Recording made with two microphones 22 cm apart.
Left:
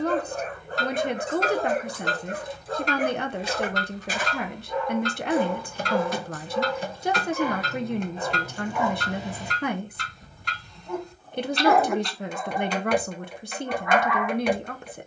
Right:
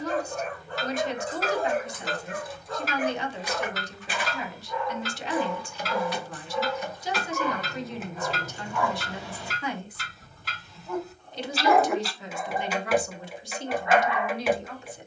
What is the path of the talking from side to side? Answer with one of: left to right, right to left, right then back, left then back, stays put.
stays put.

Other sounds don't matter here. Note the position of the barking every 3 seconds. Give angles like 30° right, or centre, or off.
40° left, 40° left, 30° left, 10° left, 20° right.